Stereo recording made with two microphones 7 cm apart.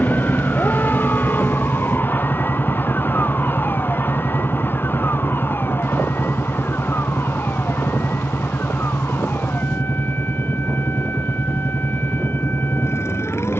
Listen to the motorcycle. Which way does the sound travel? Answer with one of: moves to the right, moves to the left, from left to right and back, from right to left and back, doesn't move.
doesn't move.